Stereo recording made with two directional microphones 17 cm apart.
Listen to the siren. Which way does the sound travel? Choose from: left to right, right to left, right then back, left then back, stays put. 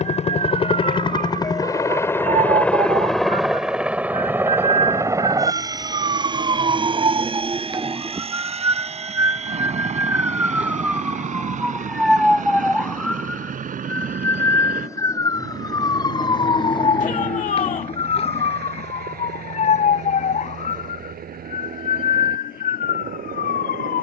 right to left.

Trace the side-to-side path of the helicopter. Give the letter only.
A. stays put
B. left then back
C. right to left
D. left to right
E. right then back
D.